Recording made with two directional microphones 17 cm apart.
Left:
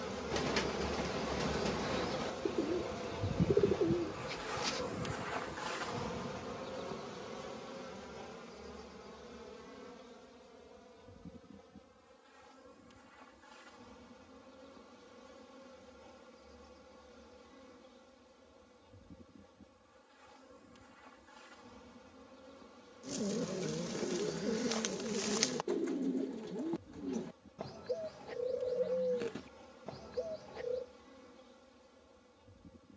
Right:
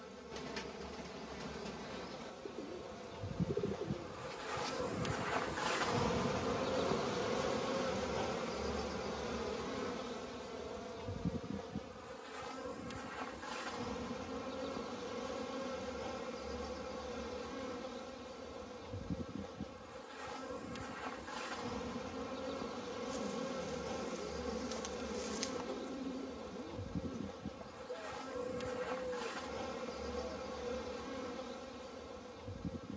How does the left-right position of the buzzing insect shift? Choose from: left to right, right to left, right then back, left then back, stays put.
left to right.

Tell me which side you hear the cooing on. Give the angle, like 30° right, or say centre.
60° left.